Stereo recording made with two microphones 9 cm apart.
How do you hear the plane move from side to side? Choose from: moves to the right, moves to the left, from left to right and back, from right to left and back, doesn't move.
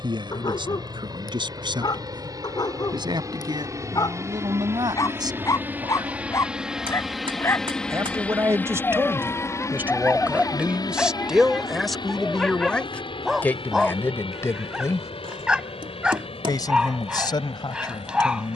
moves to the left.